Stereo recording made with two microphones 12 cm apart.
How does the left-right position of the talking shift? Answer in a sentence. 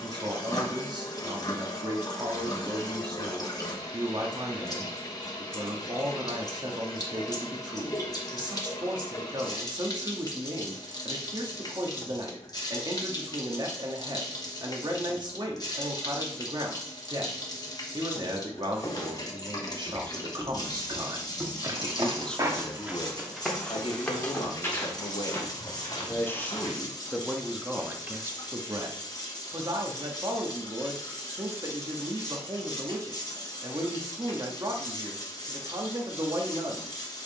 You can hear the talking go left and come back.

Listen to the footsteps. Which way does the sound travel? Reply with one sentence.
You can hear the footsteps go right and come back.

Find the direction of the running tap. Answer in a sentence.
You can hear the running tap on the left.